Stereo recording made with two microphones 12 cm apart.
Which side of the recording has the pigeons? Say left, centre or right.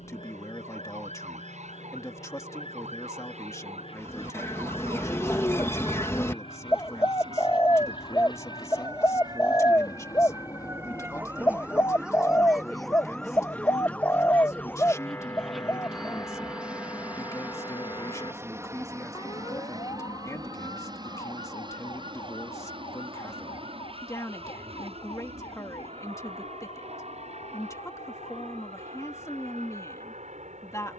left.